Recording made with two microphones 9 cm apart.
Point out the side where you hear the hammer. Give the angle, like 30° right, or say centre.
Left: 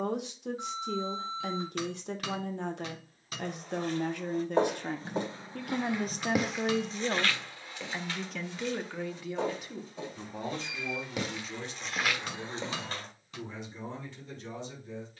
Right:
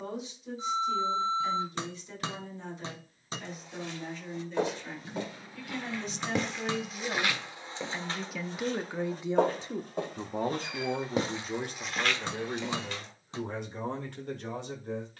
30° right.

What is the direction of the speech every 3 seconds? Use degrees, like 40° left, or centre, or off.
70° left, 60° left, 20° left, 40° right, 60° right.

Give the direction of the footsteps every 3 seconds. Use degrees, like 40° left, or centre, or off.
off, 40° left, 20° right, 40° right, 30° left.